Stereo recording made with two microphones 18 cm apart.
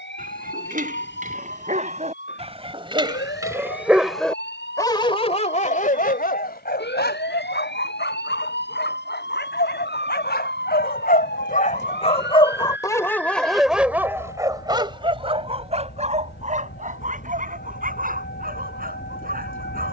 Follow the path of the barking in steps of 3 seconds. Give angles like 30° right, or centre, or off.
40° right, 10° left, 70° left, 60° left, centre, 40° right, 50° right.